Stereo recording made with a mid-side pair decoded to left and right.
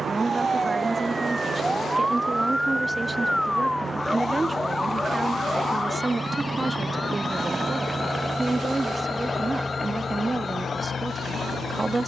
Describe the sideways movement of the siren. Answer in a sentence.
In this clip you hear the siren go from the right side to the left.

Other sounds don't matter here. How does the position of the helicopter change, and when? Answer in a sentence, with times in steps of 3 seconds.
You can hear the helicopter on the right from 0 s, in the centre from 6 s and on the left from 9 s.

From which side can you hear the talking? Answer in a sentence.
In this clip you hear the talking on the right.